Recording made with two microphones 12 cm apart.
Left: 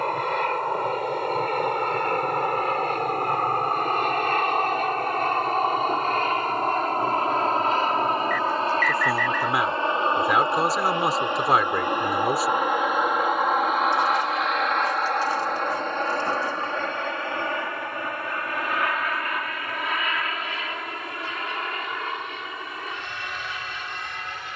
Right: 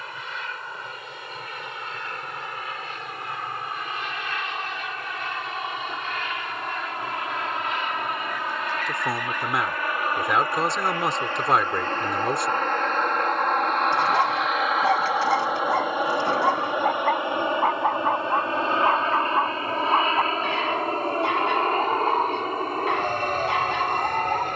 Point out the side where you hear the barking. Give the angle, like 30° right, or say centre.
70° right.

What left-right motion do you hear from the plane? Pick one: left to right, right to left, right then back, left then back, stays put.
left to right.